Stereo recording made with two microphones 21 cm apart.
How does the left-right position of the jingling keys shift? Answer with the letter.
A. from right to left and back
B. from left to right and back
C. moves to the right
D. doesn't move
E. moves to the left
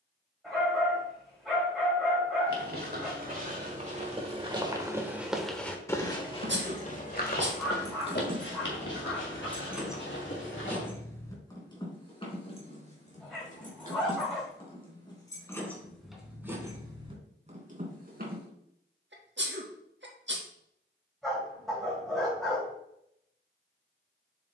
A.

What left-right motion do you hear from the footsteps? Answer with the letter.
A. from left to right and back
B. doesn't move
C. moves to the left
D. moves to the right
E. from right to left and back
C.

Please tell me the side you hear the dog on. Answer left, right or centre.
centre.